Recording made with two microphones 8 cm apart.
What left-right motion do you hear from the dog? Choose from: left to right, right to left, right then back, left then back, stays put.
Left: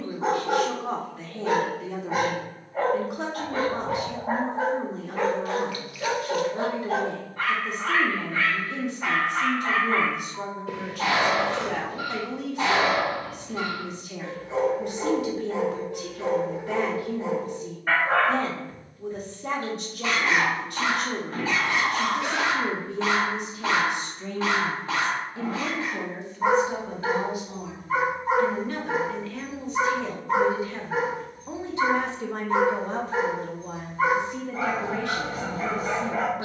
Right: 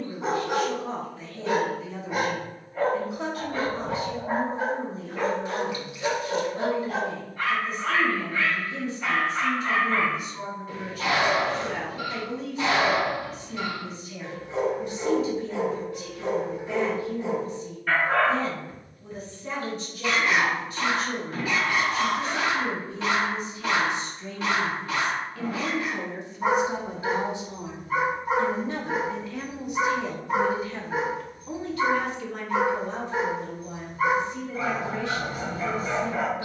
stays put.